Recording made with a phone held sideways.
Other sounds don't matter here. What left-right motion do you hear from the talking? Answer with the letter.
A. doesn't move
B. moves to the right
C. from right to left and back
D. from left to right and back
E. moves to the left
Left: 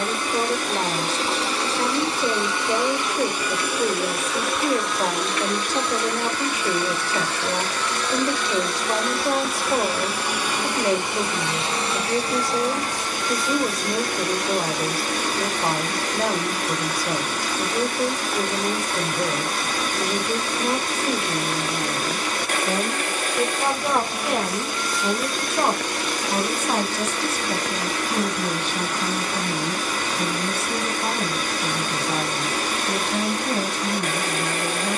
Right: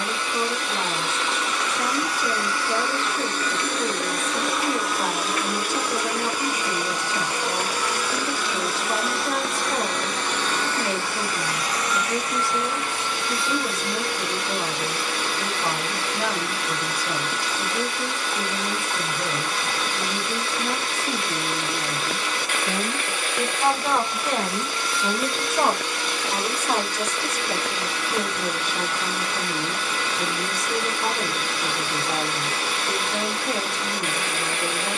B.